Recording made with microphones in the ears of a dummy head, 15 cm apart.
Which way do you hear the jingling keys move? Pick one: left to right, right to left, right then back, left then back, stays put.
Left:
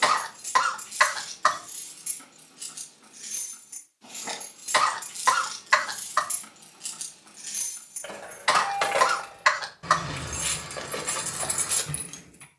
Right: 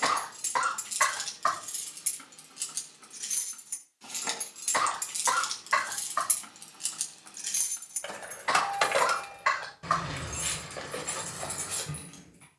right to left.